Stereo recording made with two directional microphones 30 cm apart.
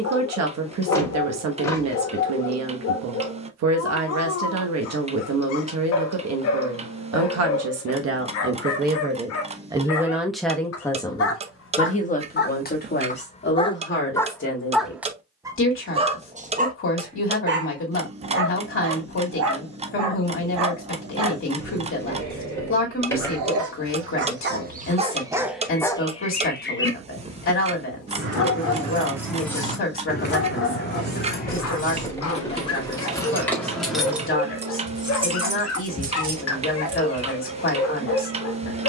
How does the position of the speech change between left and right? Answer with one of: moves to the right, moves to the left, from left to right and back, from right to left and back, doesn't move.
moves to the left.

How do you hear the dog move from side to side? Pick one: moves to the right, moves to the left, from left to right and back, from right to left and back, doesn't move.
from left to right and back.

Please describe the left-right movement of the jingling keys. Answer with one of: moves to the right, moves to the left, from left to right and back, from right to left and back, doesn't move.
from right to left and back.